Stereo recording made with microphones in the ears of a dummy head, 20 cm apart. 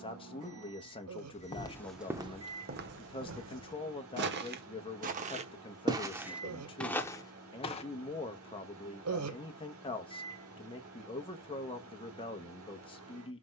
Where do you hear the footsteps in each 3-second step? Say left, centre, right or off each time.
centre, right, centre, off, off.